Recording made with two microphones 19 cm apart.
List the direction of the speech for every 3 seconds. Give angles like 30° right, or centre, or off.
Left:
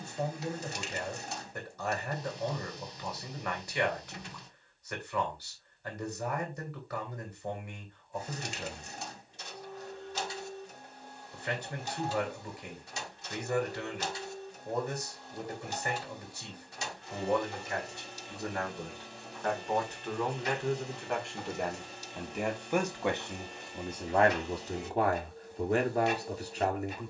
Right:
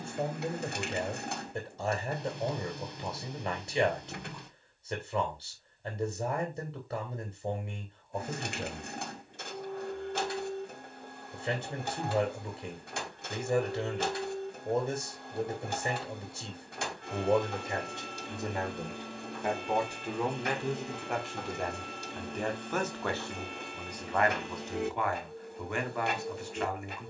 20° right, 20° right, 20° right, 20° right, 20° right, 20° right, 10° right, 10° left, 30° left.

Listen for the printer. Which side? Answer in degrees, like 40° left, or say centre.
60° right.